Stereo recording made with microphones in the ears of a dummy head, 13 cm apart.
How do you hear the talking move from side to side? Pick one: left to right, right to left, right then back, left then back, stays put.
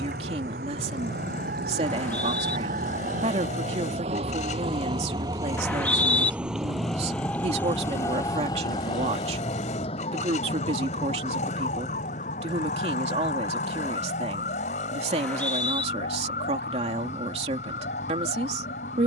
stays put.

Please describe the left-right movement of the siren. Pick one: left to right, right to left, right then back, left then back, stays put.
right to left.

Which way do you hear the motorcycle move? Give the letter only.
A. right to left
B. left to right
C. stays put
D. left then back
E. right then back
C.